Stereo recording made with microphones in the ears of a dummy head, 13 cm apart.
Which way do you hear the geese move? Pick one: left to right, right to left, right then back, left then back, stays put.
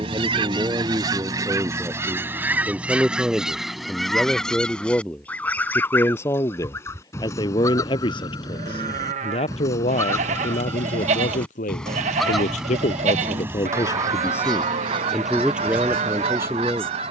left then back.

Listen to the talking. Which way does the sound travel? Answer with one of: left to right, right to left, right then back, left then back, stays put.
left then back.